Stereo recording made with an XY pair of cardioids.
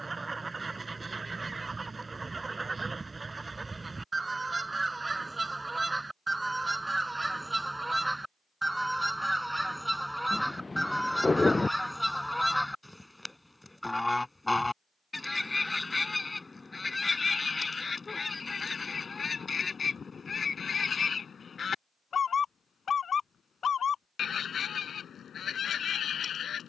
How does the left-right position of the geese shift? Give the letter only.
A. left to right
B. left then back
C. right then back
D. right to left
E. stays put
D.